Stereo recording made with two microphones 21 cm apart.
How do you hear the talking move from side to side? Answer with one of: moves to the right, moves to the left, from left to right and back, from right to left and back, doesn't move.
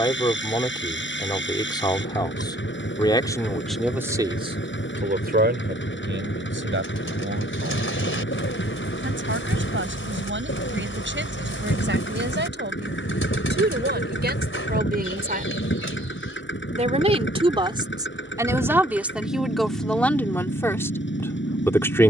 from left to right and back.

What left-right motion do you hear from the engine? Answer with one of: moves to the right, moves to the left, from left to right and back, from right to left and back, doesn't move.
doesn't move.